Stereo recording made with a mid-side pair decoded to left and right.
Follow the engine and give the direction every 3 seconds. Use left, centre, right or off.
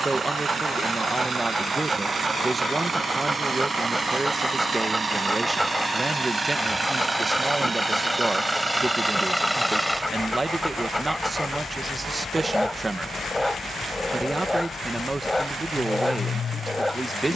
right, right, right, centre, left, left.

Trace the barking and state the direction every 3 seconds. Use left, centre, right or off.
right, centre, centre, centre, centre, centre.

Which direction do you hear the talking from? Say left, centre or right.
right.